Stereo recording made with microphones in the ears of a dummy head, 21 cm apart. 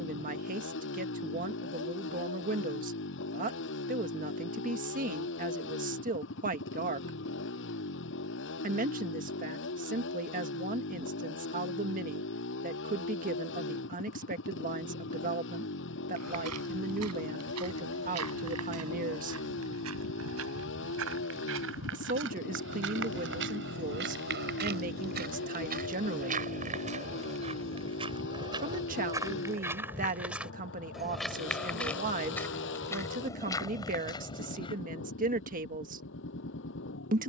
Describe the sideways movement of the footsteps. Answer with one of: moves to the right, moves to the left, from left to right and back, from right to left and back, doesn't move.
moves to the left.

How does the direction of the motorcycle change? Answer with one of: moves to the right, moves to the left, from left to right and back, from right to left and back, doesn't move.
doesn't move.